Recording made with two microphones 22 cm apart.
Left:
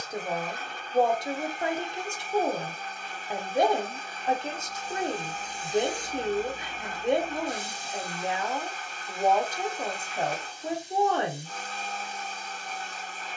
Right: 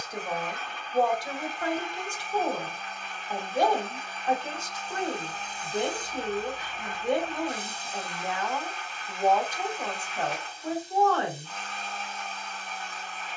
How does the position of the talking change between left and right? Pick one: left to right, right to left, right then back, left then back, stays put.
stays put.